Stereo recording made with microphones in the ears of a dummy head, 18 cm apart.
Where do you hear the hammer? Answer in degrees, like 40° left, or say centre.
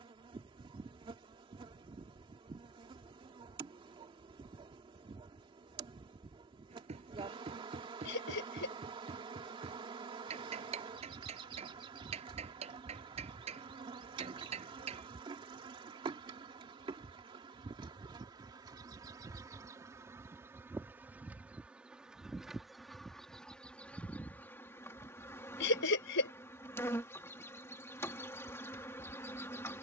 30° right.